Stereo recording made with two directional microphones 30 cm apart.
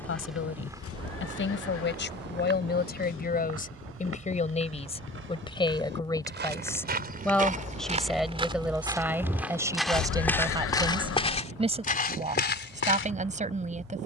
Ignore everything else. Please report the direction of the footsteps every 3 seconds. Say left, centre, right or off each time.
right, right, right, centre, left.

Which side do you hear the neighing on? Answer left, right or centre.
left.